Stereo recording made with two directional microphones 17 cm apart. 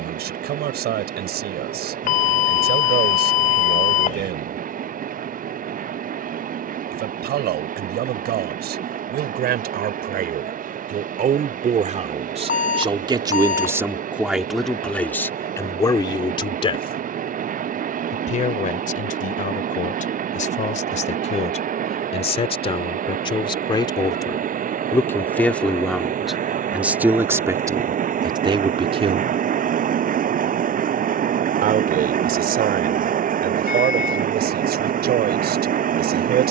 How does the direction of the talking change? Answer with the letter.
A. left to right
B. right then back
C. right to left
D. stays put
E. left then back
E.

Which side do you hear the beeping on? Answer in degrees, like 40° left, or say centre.
50° left.